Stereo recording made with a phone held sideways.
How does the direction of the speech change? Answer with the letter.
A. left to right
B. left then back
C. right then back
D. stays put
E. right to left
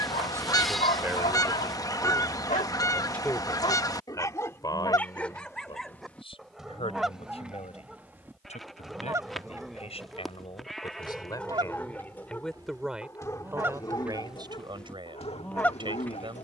B.